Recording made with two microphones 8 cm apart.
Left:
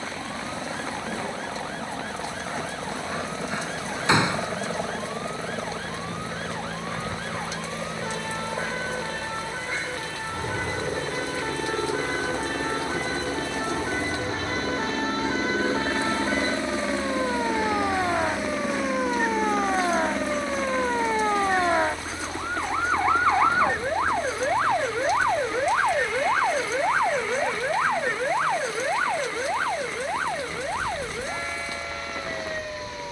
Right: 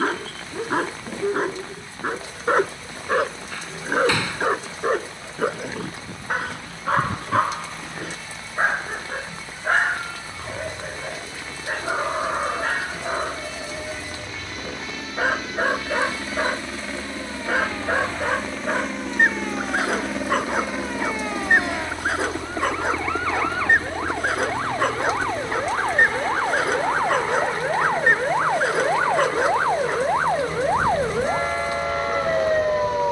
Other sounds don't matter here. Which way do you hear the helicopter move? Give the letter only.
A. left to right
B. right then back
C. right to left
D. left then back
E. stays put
A.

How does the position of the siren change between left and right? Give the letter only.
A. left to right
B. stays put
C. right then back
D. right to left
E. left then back
A.